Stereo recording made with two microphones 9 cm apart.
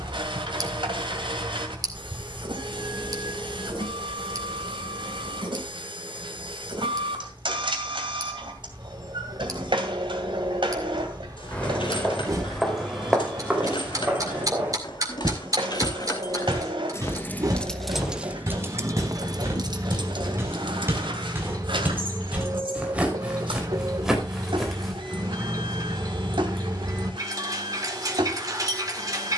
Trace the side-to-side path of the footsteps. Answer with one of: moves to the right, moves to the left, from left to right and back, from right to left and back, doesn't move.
from left to right and back.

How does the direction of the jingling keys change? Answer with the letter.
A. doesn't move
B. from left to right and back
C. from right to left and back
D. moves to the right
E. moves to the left
D.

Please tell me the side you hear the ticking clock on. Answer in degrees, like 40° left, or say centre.
40° right.